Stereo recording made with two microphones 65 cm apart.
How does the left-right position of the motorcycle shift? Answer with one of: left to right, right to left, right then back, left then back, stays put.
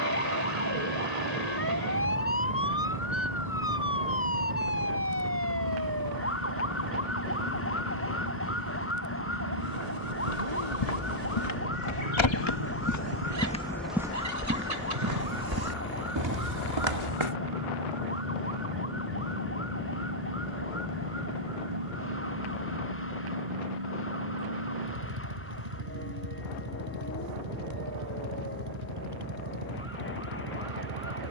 stays put.